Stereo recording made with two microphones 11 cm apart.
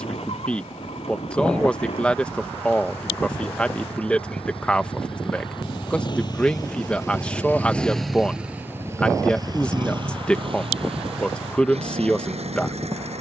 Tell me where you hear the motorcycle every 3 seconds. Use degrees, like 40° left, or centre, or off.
70° left, 60° left, 10° left, 50° right, 70° right.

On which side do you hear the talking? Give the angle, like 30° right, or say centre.
10° left.